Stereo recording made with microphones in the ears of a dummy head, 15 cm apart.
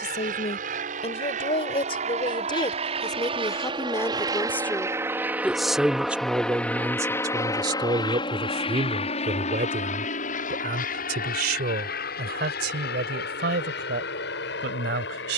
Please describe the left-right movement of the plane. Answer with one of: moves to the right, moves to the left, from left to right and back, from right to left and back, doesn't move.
moves to the left.